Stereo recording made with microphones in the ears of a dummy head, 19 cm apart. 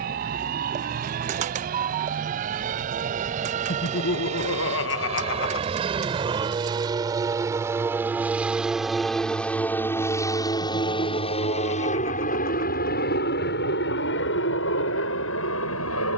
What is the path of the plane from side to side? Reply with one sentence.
In this clip you hear the plane travel towards the left.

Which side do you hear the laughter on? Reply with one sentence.
You can hear the laughter on the left.